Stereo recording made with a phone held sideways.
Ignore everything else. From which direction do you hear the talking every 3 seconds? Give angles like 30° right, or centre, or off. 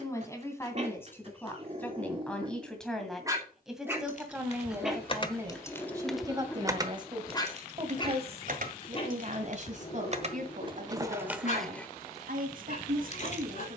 10° left, 10° right, 30° right, 60° right, 60° right.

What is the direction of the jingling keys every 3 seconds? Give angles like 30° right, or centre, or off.
off, 30° left, 30° right, 30° right, 50° left.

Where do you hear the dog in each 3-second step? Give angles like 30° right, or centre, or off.
40° right, 10° right, 20° left, 50° left, 60° left.